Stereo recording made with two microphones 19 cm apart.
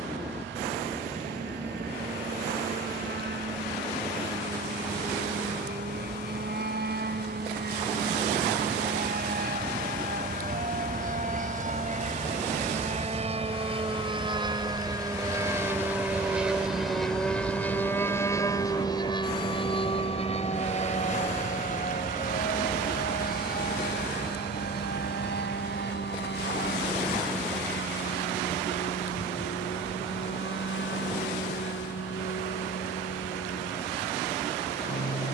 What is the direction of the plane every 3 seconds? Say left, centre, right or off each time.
right, right, right, right, right, centre, left, left, left, left, left, left.